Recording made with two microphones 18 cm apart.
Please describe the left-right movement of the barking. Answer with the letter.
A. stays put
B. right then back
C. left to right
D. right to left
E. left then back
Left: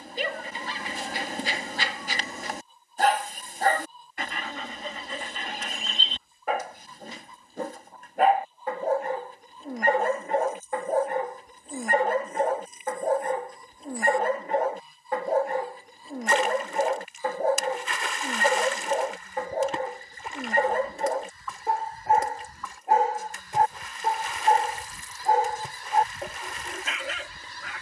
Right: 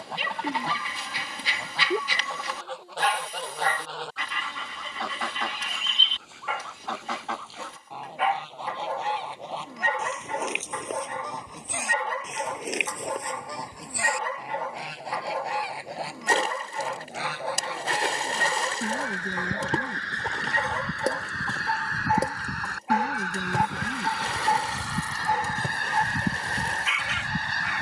A.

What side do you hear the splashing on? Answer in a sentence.
In this clip you hear the splashing on the right.